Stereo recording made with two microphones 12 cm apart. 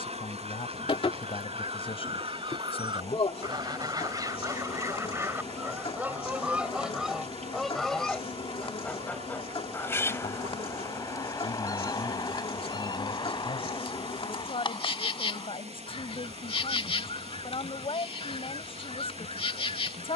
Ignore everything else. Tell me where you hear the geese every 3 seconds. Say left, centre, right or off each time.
right, right, centre, left, left, left, left.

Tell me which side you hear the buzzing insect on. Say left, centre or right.
left.